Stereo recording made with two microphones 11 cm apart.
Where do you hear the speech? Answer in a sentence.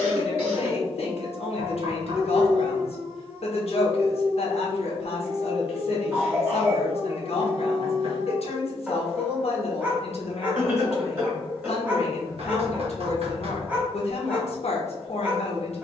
You can hear the speech on the left.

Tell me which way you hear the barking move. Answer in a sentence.
You can hear the barking stay in one place.